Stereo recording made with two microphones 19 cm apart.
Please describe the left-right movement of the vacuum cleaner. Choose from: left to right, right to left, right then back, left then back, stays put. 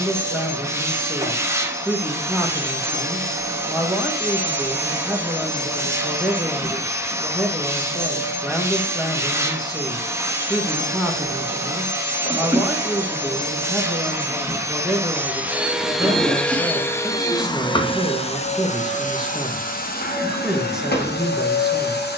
right to left.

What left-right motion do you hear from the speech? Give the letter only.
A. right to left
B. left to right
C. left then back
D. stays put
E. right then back
D.